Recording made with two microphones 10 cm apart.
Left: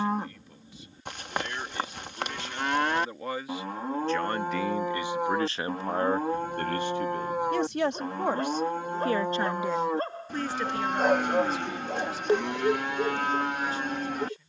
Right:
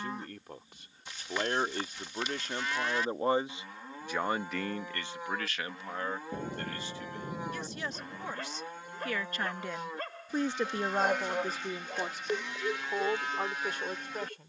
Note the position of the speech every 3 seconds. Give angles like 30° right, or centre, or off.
50° right, centre, 60° left, 10° right, 60° right.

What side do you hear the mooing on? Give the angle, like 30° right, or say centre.
60° left.